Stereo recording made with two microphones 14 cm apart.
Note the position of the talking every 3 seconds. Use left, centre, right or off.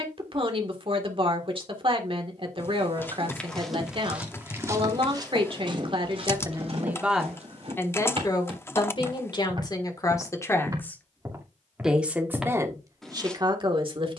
right, right, centre, left, right.